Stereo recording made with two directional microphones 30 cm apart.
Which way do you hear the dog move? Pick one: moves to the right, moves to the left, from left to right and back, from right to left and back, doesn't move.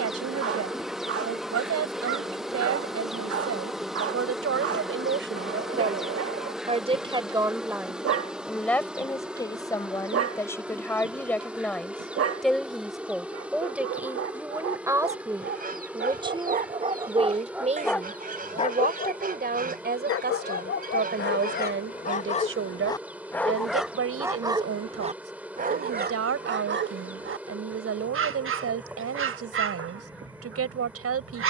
from right to left and back.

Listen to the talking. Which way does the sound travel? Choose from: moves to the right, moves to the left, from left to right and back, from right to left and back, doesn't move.
from right to left and back.